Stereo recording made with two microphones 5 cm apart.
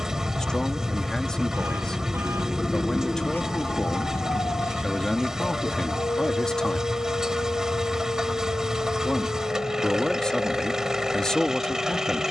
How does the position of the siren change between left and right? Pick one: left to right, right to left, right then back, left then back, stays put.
right to left.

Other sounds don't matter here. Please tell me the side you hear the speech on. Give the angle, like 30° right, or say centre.
10° left.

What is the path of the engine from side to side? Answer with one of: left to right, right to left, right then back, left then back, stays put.
stays put.